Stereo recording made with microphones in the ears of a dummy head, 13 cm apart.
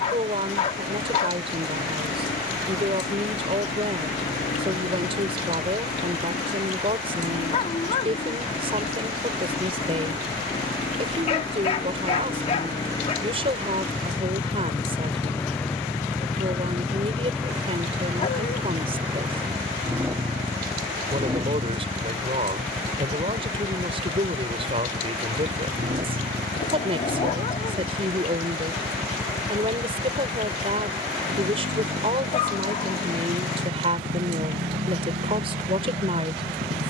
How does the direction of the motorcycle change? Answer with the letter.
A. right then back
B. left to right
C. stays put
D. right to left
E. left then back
B.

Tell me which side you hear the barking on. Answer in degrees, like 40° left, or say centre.
40° left.